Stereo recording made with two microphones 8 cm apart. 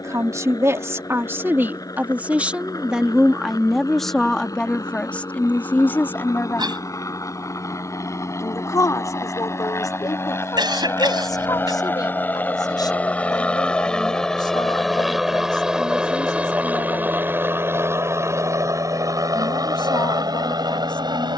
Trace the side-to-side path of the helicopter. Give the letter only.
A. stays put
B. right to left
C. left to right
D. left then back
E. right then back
C.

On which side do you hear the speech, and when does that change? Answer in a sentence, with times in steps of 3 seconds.
You can hear the speech on the right from 0 s, in the centre from 3 s and on the left from 6 s.